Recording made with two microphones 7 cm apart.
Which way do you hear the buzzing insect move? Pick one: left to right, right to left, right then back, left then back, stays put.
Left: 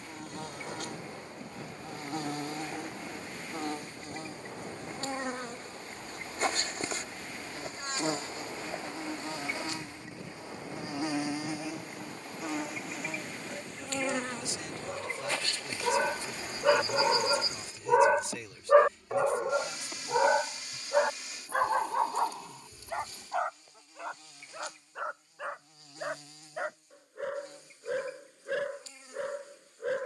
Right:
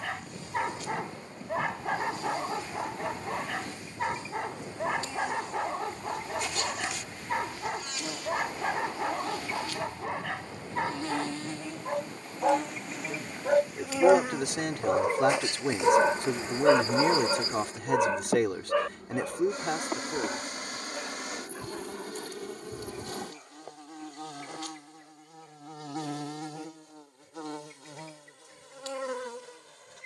left to right.